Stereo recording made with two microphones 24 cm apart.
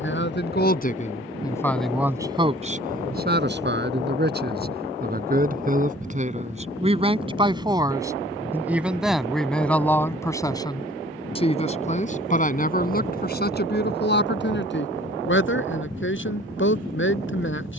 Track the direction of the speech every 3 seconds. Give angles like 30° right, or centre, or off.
20° left, 40° right, 20° right, 10° left, 40° left, 50° left.